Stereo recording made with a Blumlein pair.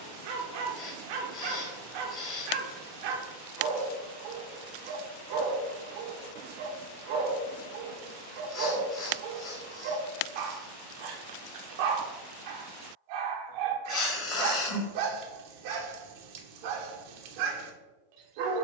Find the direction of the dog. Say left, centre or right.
right.